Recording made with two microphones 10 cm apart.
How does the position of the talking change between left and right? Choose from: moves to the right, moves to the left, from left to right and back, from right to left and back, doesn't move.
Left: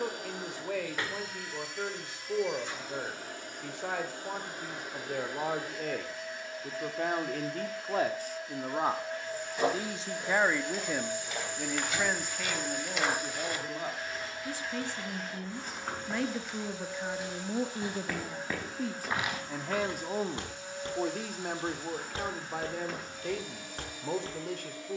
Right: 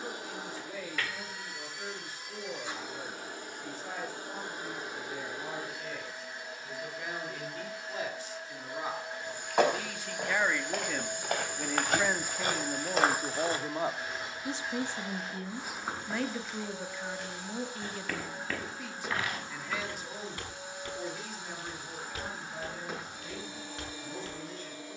from left to right and back.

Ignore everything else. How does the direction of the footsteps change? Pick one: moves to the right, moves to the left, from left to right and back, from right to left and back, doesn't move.
moves to the left.